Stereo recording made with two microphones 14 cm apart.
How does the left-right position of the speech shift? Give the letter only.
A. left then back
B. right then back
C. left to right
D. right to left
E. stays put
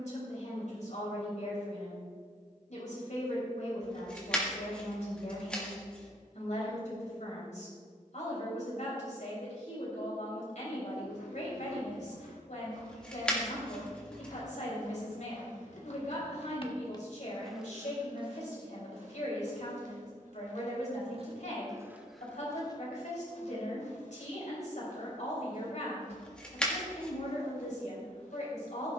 E.